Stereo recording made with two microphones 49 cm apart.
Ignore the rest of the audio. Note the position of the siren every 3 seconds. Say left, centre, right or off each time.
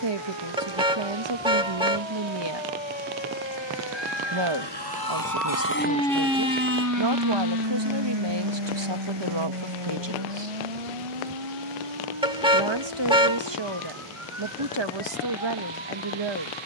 left, left, right, right, right, right.